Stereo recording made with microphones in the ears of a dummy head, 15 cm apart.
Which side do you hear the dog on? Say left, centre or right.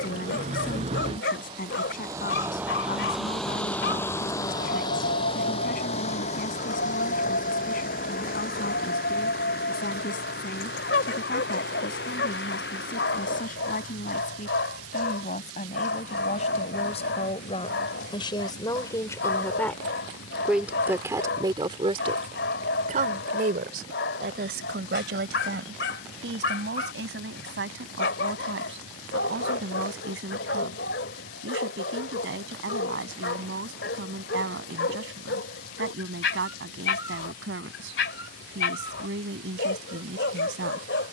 left.